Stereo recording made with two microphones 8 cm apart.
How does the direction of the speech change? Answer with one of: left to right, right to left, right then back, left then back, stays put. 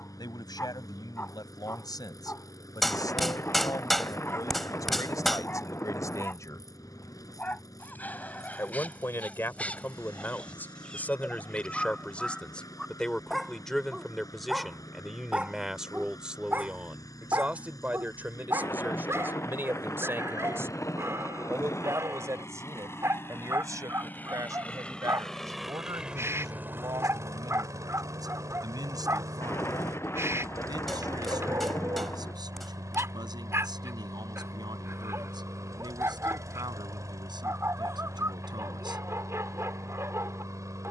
left to right.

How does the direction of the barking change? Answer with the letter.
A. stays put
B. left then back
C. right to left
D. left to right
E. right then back
D.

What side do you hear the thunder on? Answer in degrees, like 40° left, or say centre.
30° left.